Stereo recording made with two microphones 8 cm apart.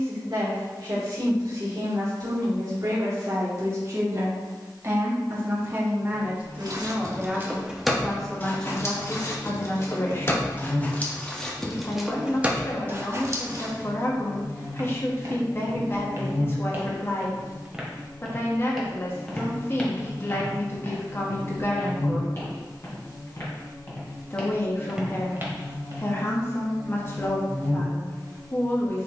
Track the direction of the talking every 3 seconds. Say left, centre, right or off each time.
right, right, centre, left, left, left, left, left, left, left.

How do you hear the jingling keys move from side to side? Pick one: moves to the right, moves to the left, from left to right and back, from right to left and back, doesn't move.
from right to left and back.